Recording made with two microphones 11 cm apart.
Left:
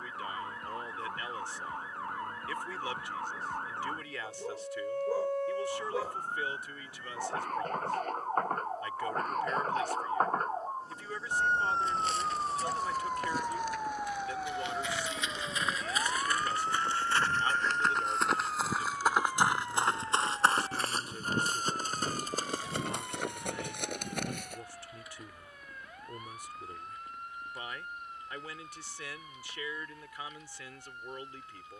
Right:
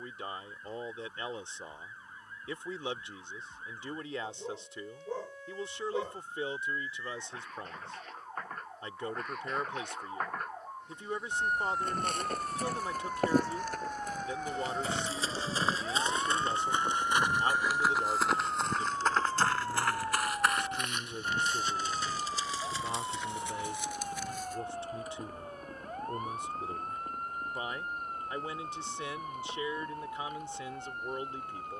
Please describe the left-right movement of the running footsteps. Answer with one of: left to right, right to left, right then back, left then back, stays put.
right to left.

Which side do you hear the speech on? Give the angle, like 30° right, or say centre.
20° right.